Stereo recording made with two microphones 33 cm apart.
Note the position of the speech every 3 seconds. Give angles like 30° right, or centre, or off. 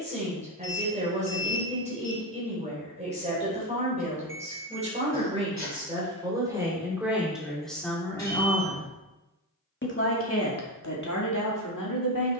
20° right, 20° right, centre, 50° left.